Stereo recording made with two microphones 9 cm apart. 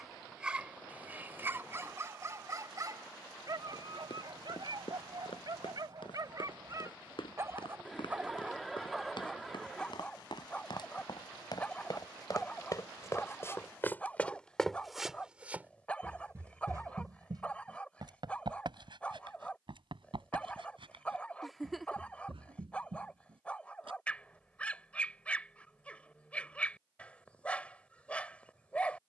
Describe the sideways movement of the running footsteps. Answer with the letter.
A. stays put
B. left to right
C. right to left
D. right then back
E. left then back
B.